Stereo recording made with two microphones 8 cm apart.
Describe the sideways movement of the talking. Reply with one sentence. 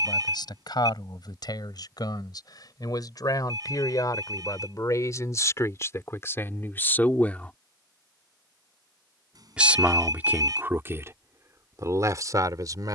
You can hear the talking move to the right.